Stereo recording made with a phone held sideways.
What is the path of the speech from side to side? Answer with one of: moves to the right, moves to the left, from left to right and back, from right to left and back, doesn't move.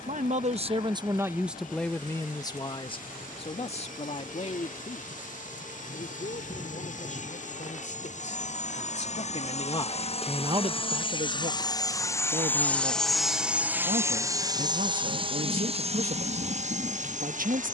from right to left and back.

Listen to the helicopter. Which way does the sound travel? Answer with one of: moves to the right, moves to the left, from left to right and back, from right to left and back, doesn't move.
moves to the right.